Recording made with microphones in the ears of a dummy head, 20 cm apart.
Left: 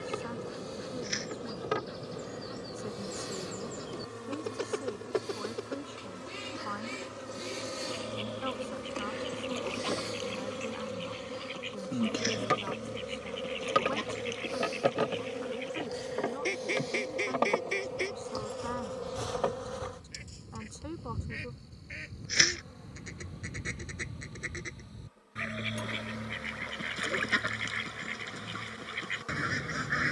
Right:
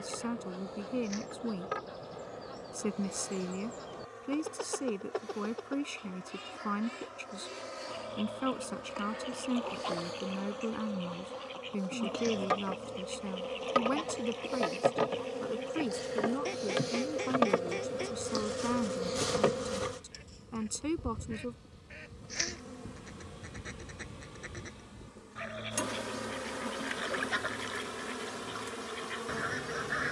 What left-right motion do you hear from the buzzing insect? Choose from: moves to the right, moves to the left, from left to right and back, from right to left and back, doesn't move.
moves to the right.